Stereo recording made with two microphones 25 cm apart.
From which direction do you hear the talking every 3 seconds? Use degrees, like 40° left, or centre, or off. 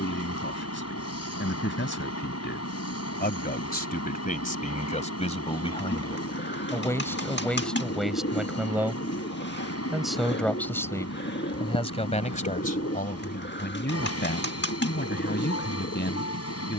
50° left, 30° left, centre, 10° left, 40° left, 50° left.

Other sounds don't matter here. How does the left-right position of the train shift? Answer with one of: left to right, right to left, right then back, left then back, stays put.
stays put.